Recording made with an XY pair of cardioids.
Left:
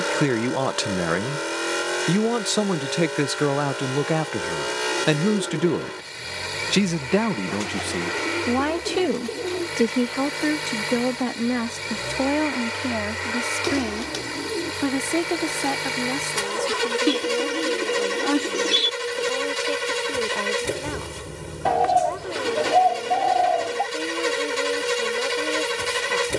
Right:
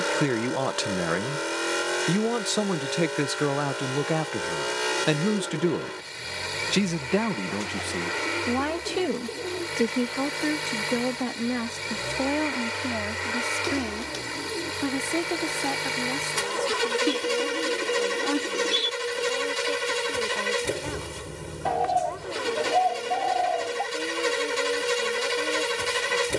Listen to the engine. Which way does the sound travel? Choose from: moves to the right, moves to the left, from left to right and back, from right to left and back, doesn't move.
doesn't move.